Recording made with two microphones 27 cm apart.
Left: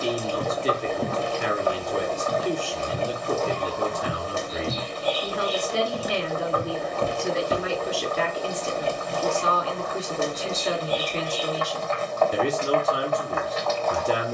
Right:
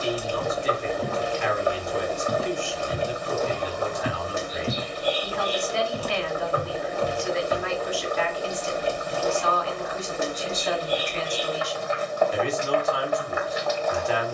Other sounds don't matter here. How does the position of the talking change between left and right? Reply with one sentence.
You can hear the talking stay in one place.